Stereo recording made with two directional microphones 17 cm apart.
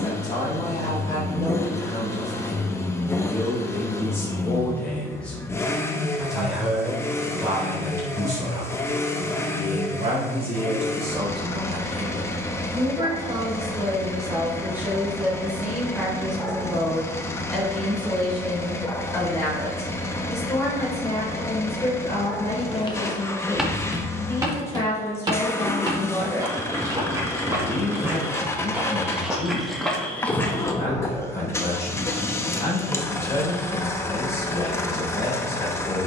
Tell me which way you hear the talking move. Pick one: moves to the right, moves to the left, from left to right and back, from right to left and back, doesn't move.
from left to right and back.